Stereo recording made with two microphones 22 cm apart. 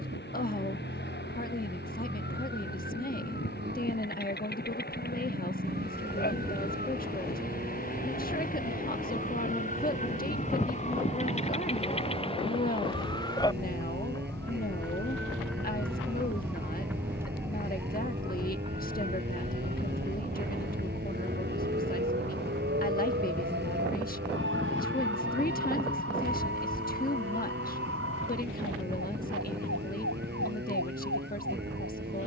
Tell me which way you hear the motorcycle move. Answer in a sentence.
In this clip you hear the motorcycle stay put.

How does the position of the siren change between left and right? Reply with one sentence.
You can hear the siren go from the left side to the right.